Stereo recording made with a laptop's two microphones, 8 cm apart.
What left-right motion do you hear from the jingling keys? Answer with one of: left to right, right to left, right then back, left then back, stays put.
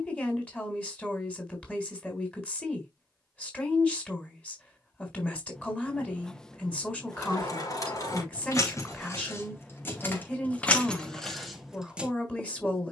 left to right.